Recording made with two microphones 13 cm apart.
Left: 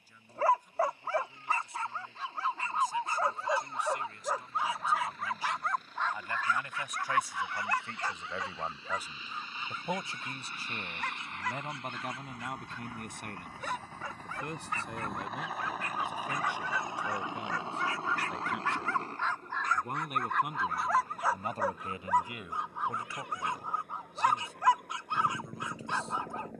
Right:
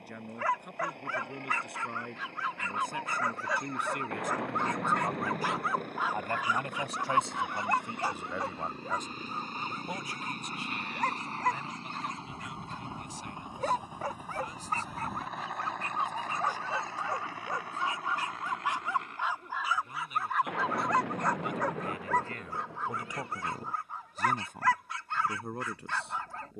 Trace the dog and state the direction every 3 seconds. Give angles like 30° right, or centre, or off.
30° left, 10° left, 20° right, 40° right, 40° right, 30° right, 10° right, 10° left, 20° left.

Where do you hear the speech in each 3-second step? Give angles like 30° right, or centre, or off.
70° right, 60° right, 20° right, 30° left, 60° left, 70° left, 60° left, centre, 60° right.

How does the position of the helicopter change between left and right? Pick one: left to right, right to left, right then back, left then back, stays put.
right to left.